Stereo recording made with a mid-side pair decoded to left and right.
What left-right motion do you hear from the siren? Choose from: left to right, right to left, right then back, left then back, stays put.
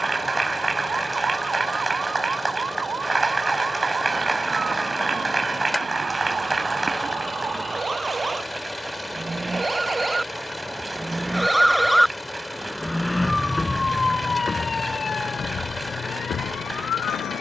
right to left.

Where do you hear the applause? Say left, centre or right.
right.